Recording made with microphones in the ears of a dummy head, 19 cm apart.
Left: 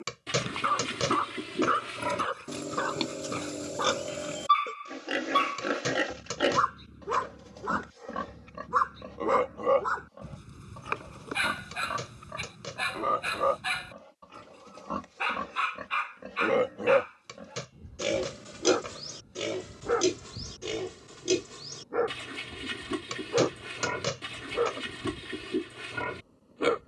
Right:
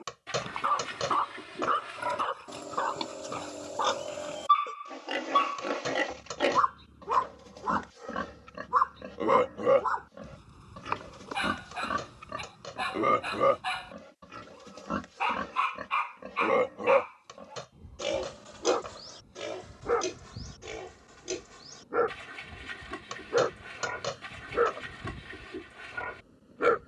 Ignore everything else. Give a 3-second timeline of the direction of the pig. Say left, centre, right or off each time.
left, left, centre, right, right, centre, left, left, left.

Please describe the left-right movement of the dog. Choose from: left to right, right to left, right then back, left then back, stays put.
left to right.